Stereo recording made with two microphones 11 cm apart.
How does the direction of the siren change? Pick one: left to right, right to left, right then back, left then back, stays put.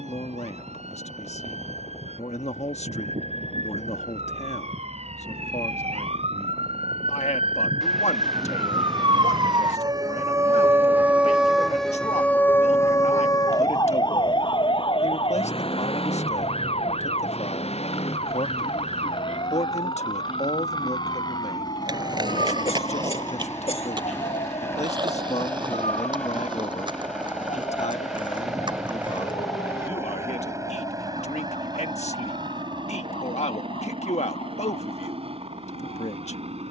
right to left.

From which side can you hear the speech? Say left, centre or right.
left.